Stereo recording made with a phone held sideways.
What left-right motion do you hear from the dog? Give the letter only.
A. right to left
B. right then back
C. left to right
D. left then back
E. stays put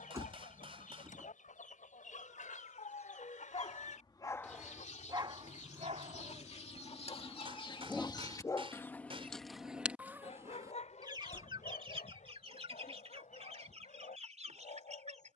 B.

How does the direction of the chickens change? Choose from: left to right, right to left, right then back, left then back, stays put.
left to right.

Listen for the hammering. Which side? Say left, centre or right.
right.